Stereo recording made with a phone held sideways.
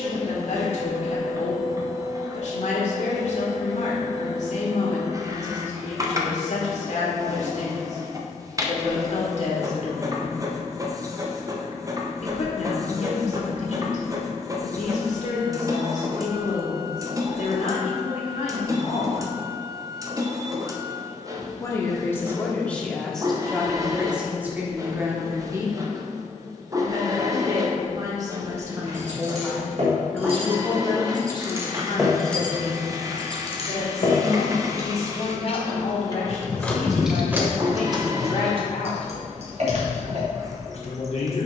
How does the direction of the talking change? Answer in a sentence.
You can hear the talking move from left to right and back again.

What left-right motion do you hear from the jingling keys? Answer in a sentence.
In this clip you hear the jingling keys go left and come back.